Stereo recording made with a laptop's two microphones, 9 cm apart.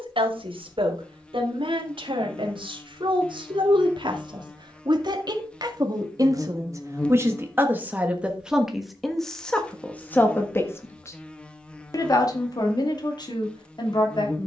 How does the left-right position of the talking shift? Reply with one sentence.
In this clip you hear the talking go from the right side to the left.